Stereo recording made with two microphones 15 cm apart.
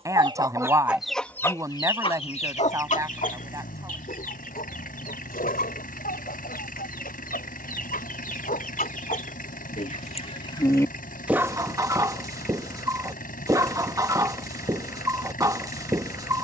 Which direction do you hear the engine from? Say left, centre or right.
left.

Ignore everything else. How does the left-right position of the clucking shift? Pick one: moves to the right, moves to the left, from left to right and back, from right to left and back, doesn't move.
from right to left and back.